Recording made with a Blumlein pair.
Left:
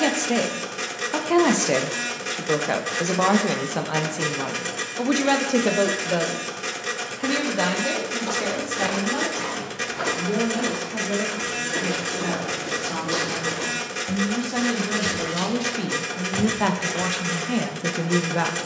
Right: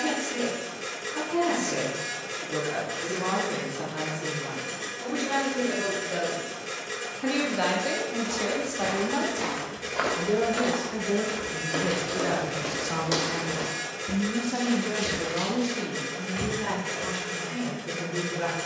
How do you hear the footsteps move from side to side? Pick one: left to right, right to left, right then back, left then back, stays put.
right then back.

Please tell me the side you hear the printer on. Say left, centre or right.
left.